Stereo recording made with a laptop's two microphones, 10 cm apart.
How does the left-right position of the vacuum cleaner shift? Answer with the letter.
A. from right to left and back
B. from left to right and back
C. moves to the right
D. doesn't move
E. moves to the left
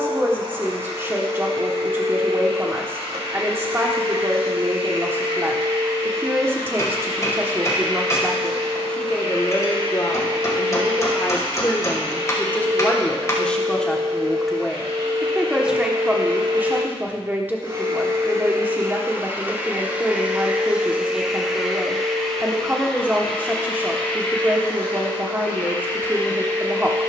E.